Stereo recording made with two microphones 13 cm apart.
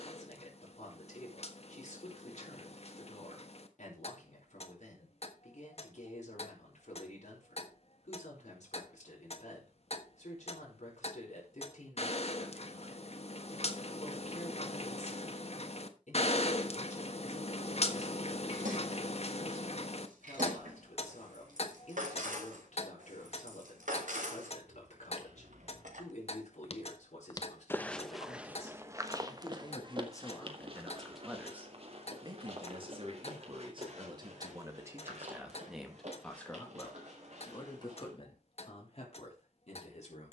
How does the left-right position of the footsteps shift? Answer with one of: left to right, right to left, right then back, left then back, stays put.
left to right.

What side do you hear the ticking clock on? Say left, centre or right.
left.